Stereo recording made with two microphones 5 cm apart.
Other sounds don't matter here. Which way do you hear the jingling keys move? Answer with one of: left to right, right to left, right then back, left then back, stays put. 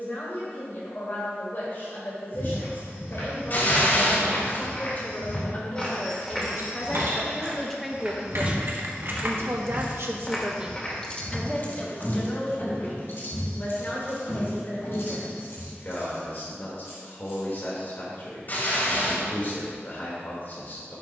right to left.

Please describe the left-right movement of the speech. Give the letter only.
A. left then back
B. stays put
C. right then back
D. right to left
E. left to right
C.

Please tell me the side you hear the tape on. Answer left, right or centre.
left.